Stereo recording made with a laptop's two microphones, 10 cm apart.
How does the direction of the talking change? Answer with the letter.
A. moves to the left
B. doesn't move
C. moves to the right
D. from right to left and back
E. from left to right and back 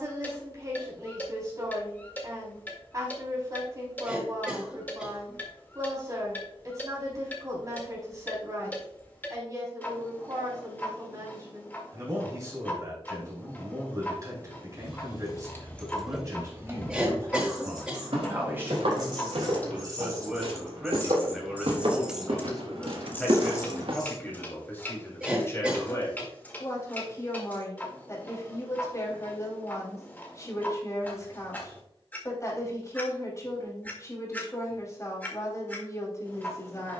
A.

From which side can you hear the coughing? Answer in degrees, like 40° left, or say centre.
10° right.